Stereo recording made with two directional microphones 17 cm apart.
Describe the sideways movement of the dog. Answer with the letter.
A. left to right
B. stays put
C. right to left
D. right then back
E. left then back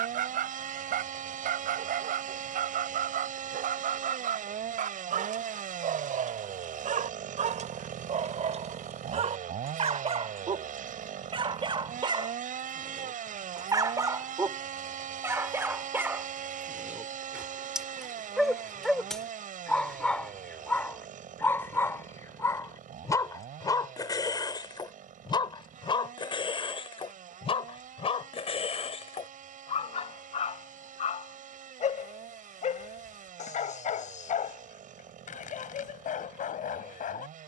C.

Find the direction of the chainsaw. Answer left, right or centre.
right.